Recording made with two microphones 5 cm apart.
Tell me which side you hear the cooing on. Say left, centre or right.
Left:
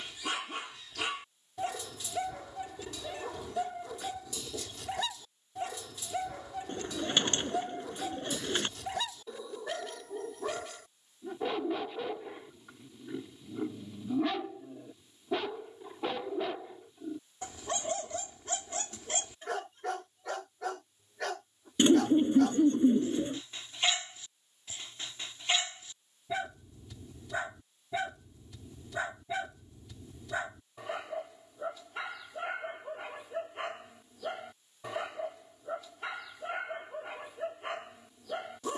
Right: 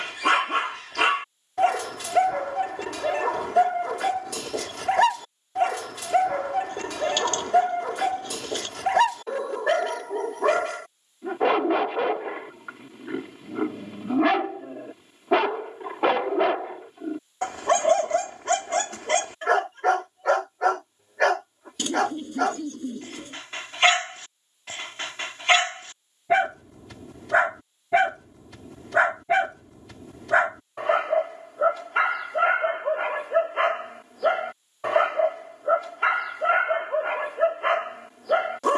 left.